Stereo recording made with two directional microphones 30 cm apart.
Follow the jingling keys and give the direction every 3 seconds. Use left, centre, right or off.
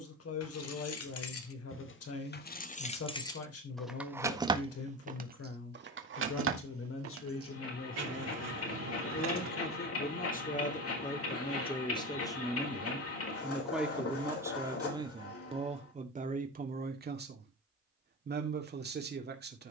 left, centre, right, right, off, off, off.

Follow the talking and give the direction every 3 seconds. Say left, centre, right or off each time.
left, left, left, left, centre, right, right.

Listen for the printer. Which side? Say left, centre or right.
left.